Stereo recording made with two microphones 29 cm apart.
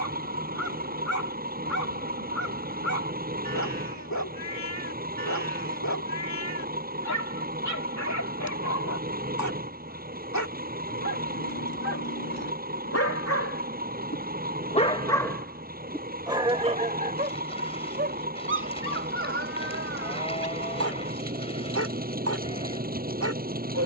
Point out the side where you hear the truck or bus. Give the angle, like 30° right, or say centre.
30° right.